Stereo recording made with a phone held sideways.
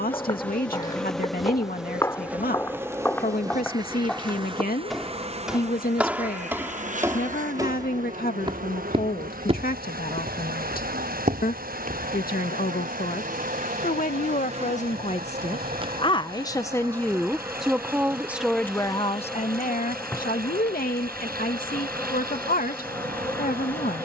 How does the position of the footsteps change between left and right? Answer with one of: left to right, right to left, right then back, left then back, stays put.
left to right.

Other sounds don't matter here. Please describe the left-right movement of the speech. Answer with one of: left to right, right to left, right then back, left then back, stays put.
right then back.